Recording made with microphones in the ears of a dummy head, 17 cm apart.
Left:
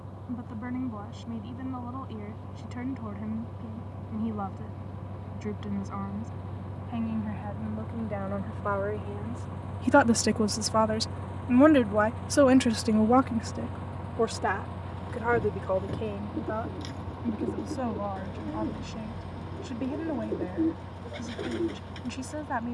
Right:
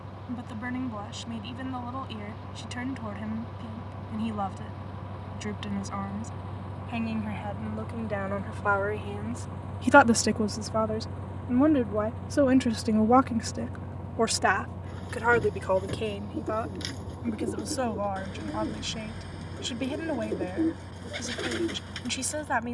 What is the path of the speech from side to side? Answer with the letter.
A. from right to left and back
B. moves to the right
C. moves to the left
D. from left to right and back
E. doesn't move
A.